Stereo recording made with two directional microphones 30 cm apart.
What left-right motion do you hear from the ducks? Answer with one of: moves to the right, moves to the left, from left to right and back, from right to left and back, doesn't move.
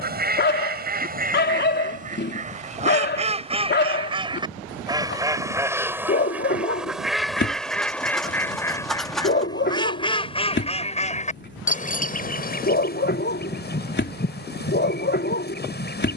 moves to the left.